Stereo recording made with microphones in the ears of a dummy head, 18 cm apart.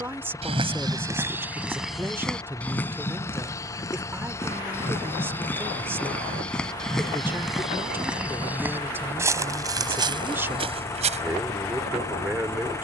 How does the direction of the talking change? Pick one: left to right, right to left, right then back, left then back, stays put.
stays put.